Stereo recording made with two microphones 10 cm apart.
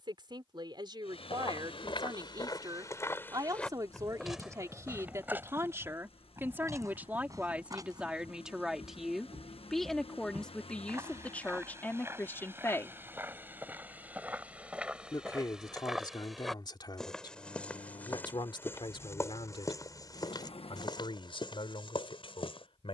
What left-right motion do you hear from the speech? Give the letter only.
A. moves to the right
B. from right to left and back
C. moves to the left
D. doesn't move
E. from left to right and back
C.